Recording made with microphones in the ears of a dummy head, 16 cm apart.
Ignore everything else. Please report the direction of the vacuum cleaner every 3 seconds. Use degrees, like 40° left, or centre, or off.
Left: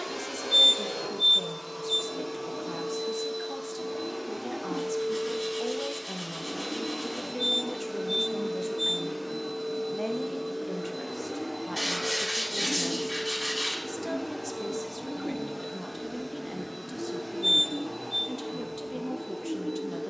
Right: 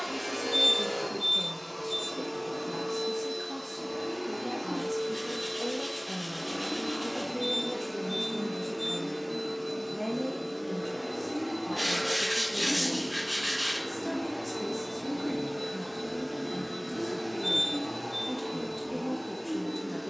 30° left, 30° left, 30° left, 30° left, 10° left, 20° right, 40° right.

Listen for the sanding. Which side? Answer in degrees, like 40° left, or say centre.
80° left.